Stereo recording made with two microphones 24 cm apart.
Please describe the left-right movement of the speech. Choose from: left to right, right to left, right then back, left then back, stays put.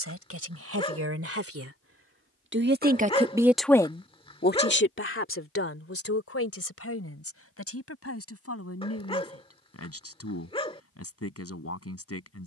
right to left.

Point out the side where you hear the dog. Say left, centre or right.
left.